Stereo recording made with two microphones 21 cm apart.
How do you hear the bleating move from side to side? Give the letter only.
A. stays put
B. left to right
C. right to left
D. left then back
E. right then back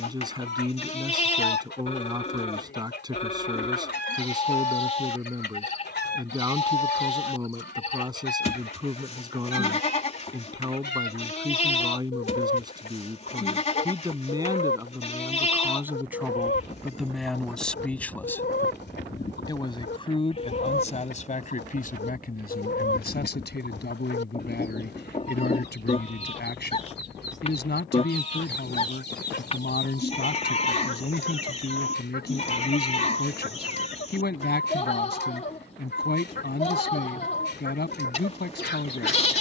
A.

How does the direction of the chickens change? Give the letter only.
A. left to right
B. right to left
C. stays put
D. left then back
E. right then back
C.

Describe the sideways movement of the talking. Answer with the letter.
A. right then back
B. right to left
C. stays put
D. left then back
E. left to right
B.